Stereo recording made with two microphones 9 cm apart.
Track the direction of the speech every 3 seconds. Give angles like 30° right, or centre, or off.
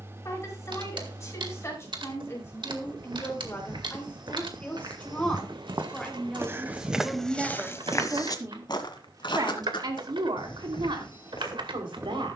30° left, 20° left, 10° right, 60° right.